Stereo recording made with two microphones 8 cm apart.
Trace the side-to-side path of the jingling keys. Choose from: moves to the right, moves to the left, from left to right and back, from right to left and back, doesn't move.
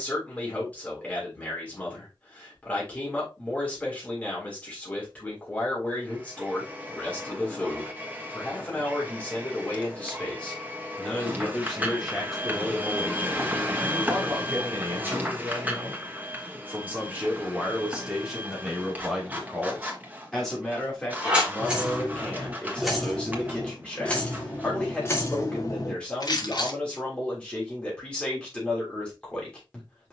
moves to the left.